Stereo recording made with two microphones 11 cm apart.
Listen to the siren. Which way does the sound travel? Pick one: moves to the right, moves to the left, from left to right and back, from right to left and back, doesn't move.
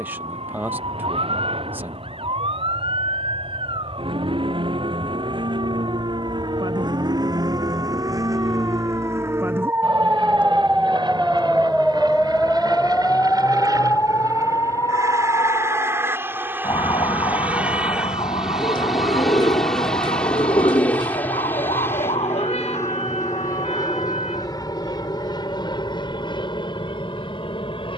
moves to the left.